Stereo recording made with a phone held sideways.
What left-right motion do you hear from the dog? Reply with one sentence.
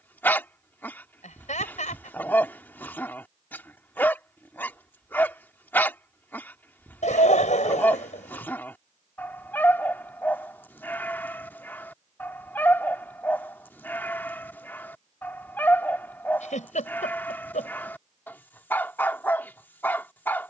You can hear the dog stay in one place.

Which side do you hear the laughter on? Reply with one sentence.
In this clip you hear the laughter on the left.